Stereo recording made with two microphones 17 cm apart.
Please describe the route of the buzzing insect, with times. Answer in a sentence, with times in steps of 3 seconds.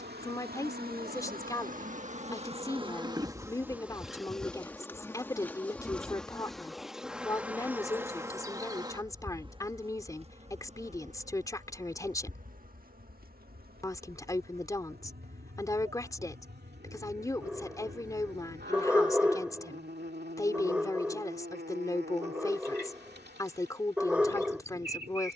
In this clip you hear the buzzing insect on the right from 0 s, in the centre from 3 s and on the right from 9 s.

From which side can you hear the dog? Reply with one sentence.
In this clip you hear the dog in the centre.